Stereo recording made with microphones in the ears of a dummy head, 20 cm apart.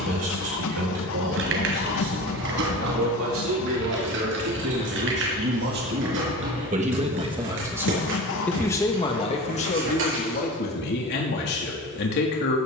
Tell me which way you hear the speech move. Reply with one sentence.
You can hear the speech travel towards the left.